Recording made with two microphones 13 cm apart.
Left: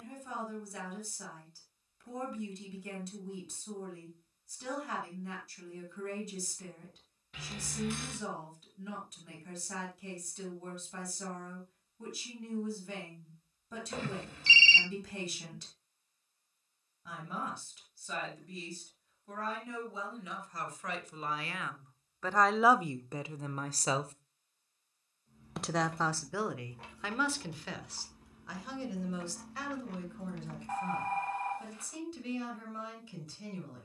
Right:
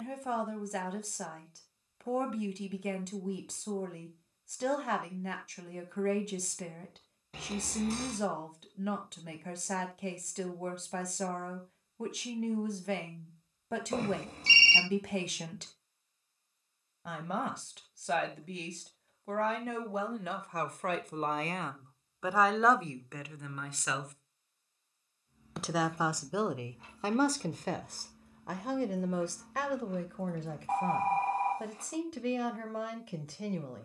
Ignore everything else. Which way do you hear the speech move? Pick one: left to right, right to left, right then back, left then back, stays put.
left then back.